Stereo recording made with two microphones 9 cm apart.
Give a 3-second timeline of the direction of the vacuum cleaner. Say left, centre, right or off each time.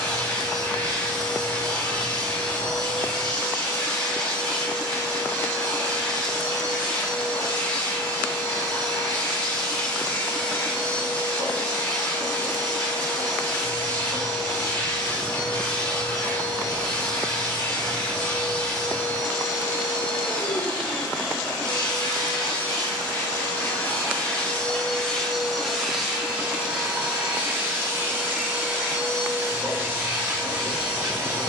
left, left, left, left, left, left, left, left, centre, right, right.